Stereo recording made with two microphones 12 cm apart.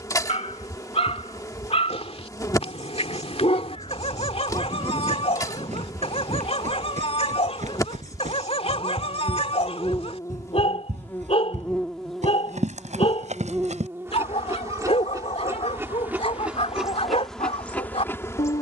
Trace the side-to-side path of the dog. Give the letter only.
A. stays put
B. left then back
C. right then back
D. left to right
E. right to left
A.